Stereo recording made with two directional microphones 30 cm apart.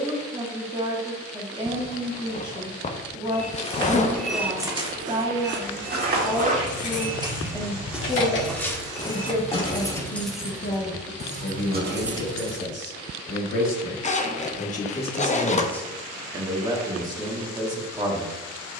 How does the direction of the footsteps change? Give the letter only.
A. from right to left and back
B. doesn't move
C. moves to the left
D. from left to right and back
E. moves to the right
D.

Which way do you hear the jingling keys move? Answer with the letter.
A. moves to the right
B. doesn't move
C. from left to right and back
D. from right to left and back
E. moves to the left
A.